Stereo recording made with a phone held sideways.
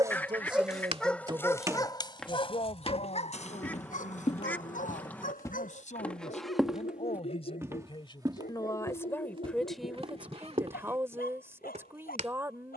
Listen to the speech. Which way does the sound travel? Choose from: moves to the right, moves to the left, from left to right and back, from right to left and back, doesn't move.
from right to left and back.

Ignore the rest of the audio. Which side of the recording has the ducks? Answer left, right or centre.
centre.